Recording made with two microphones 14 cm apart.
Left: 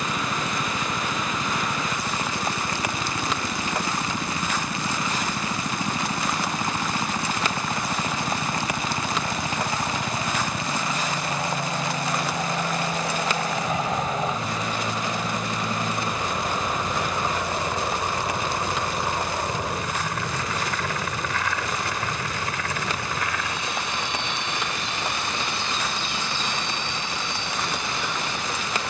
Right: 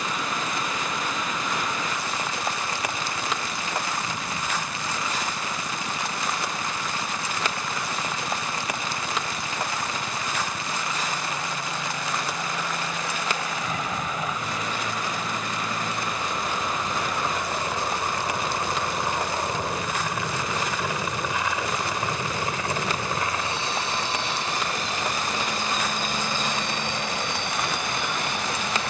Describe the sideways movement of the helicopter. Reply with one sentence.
You can hear the helicopter move from left to right.